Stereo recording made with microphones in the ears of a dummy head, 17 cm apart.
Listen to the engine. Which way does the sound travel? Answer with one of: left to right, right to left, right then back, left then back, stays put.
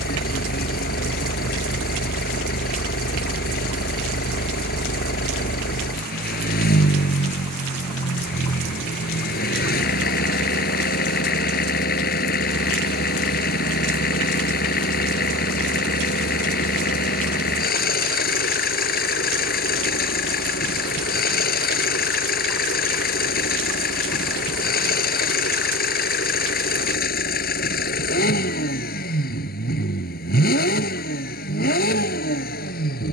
stays put.